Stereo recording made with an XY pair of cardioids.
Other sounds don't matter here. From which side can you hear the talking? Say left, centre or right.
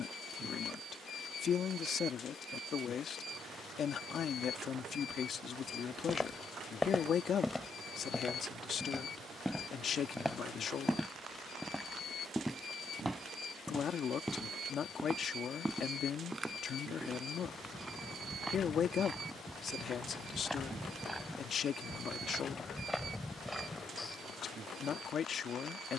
left.